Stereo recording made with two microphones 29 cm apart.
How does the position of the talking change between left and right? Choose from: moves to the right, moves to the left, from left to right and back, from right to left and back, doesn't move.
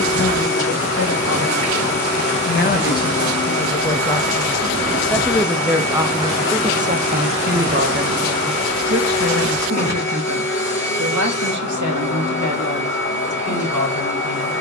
moves to the right.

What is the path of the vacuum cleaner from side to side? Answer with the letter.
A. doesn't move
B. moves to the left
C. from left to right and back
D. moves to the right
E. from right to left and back
A.